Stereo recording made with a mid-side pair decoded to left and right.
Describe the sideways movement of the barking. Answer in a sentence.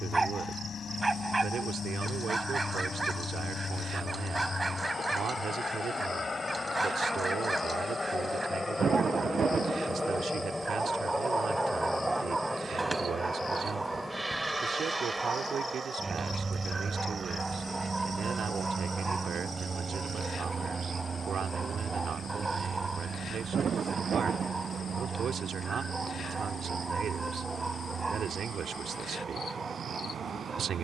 You can hear the barking stay put.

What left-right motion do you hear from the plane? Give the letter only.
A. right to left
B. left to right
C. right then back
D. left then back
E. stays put
B.